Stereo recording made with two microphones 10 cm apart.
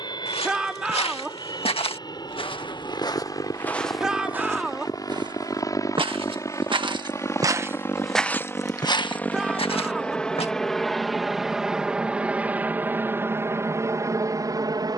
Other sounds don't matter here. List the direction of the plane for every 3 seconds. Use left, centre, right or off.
left, left, left, centre, right.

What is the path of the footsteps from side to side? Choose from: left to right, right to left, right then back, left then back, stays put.
right then back.